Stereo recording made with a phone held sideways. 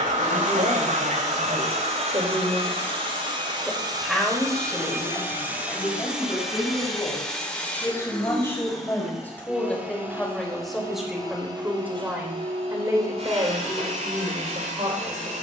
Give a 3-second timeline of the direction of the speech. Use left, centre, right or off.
right, centre, left, centre, right.